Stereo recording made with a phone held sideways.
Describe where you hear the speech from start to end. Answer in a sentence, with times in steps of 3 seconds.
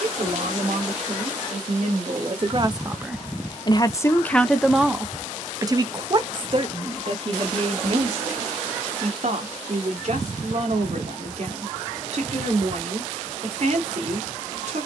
You can hear the speech on the right from 0 s, in the centre from 3 s and on the right from 6 s.